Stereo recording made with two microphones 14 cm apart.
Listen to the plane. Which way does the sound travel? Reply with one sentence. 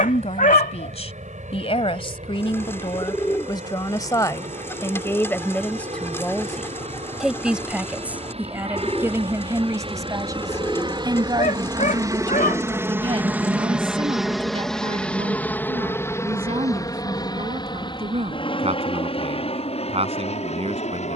In this clip you hear the plane go from the right side to the left.